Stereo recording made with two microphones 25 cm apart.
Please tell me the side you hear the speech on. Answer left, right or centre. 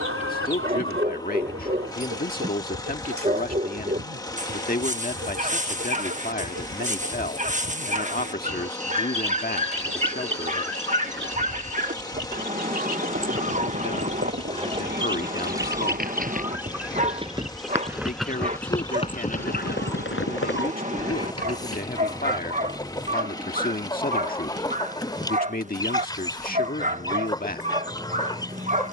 left.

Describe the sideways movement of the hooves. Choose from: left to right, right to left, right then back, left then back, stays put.
right to left.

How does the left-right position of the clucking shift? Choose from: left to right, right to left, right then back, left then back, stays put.
right to left.